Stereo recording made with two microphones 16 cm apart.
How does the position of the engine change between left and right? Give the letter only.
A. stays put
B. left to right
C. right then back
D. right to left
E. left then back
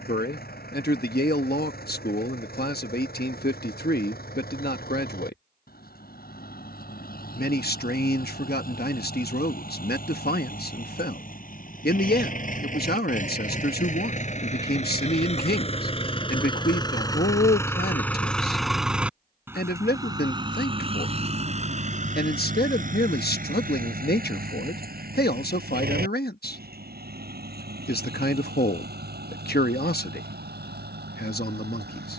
B.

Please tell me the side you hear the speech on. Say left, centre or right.
left.